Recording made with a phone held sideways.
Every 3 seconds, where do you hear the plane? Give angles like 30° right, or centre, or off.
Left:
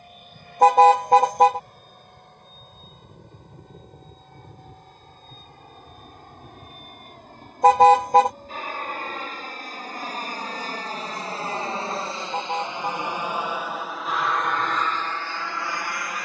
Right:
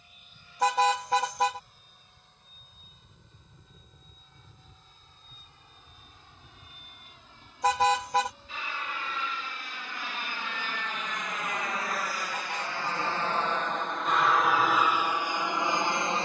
70° left, 60° left, 60° left, 40° left, 10° left, 20° right.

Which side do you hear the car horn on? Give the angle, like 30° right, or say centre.
50° left.